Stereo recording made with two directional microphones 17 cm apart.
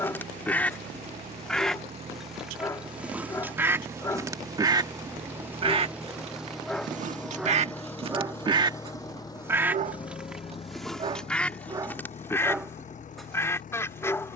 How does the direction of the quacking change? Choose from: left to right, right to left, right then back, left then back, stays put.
right then back.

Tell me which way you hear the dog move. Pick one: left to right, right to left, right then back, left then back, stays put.
right then back.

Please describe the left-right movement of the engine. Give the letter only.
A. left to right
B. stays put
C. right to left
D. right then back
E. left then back
C.